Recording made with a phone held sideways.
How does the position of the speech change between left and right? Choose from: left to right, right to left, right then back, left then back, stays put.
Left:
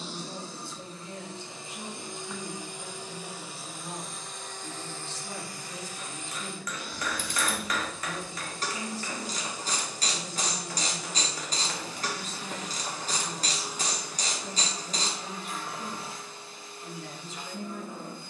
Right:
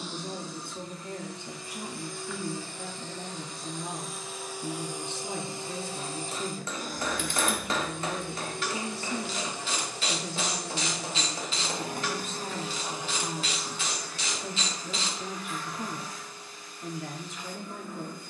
stays put.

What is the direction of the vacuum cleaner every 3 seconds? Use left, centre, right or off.
left, centre, right, right, centre, left.